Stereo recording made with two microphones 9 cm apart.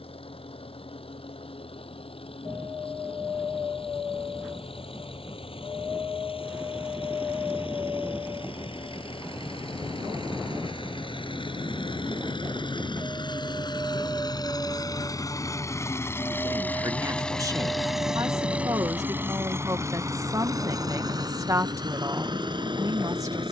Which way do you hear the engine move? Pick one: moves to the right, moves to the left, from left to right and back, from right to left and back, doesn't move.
moves to the right.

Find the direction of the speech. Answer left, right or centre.
right.